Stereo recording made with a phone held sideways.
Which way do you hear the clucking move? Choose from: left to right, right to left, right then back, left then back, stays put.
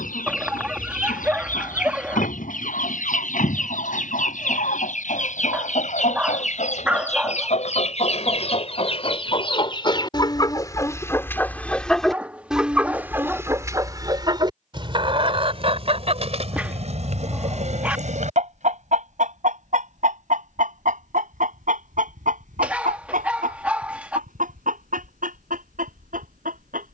left to right.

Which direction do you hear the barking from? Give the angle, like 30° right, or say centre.
10° right.